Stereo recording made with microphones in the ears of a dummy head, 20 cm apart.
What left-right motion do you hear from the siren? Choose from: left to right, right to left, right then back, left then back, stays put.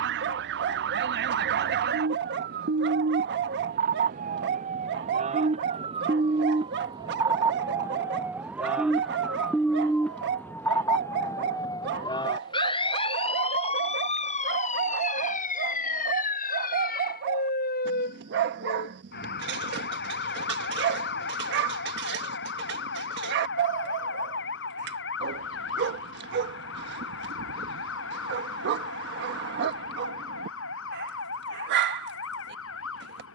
right to left.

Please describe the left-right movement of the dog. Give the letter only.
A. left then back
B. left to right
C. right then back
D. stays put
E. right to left
D.